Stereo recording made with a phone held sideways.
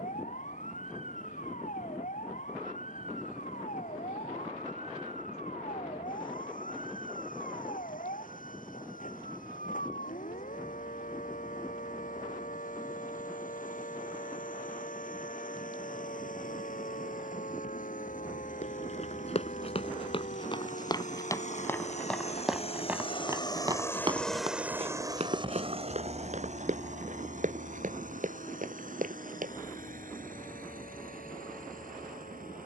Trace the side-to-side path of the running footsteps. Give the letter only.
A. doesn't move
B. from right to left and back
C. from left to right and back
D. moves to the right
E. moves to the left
D.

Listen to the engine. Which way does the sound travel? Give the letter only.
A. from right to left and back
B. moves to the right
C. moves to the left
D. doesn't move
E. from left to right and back
B.